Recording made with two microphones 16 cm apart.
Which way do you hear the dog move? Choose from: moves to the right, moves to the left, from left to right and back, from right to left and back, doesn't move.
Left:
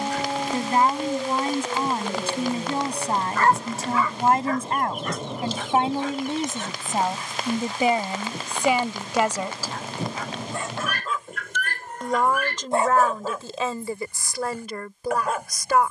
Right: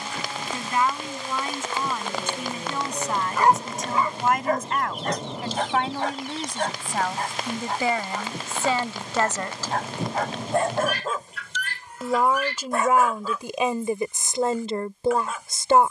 from left to right and back.